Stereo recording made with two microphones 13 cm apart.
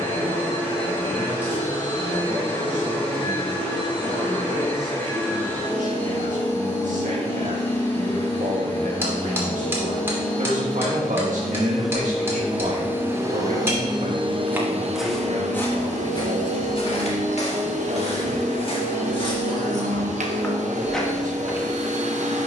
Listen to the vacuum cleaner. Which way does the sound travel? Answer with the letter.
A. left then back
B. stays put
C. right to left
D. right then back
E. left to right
E.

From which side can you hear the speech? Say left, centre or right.
right.